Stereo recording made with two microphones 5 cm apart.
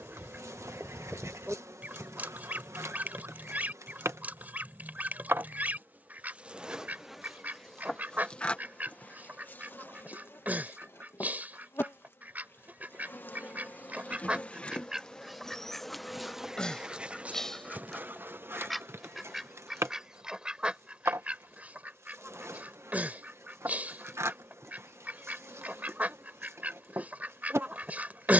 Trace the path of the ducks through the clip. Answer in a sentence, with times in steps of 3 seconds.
You can hear the ducks on the right from 0 s, in the centre from 15 s and on the right from 21 s.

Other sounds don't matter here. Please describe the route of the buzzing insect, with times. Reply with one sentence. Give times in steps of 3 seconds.
You can hear the buzzing insect on the right from 0 s, in the centre from 6 s, on the left from 9 s, in the centre from 15 s and on the right from 18 s.